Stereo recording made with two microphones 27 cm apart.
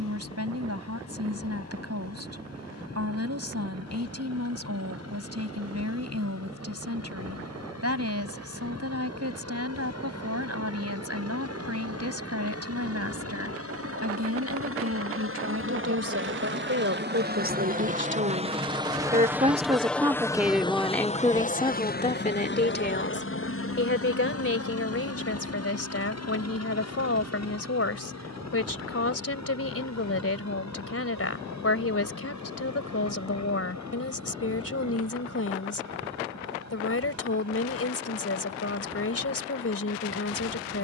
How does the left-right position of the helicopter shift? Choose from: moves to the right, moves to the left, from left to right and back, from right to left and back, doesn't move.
moves to the left.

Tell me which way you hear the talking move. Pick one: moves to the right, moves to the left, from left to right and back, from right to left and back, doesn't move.
moves to the left.